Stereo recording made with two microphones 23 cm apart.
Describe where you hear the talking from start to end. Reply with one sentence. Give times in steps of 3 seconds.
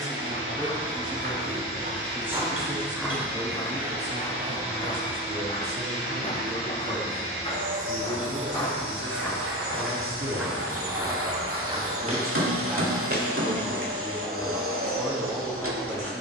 In this clip you hear the talking in the centre from 0 s, on the right from 3 s and in the centre from 12 s.